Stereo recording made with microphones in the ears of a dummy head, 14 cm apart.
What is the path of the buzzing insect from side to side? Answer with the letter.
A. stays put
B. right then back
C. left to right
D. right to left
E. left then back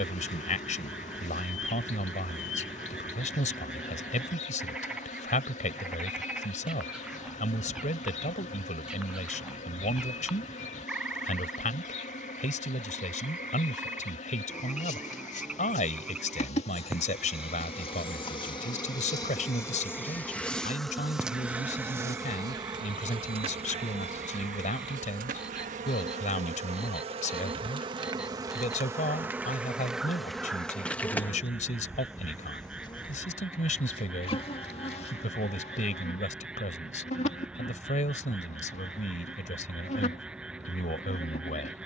B.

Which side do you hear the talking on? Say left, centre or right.
left.